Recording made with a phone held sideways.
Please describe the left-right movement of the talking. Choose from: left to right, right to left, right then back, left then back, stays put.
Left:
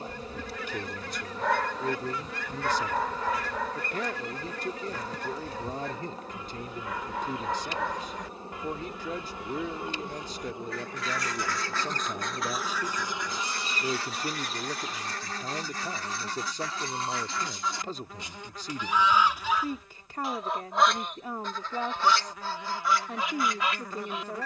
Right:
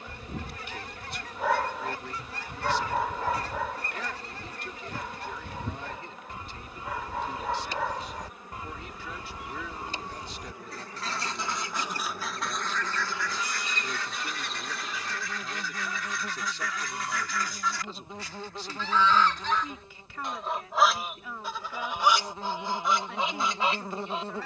stays put.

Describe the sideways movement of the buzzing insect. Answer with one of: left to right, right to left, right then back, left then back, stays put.
left to right.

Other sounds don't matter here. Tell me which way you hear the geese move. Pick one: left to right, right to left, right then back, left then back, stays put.
left then back.